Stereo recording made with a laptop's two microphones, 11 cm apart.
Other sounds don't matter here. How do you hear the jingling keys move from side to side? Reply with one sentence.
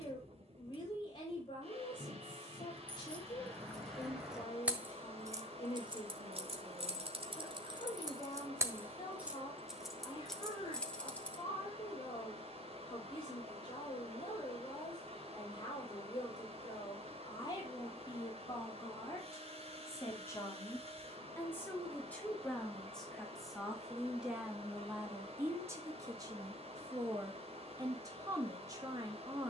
In this clip you hear the jingling keys move from left to right and back again.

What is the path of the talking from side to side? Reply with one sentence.
You can hear the talking travel towards the right.